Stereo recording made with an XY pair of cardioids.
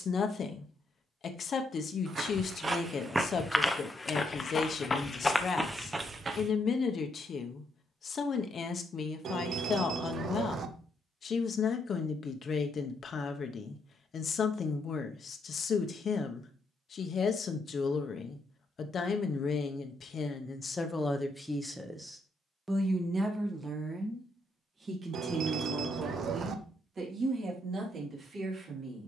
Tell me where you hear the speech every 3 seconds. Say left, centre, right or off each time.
left, left, left, left, left, left, left, centre, right, right.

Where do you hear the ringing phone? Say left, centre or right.
right.